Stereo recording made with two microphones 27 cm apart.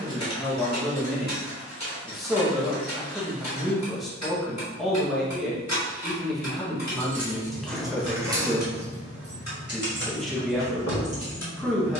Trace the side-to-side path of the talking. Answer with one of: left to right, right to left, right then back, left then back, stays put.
stays put.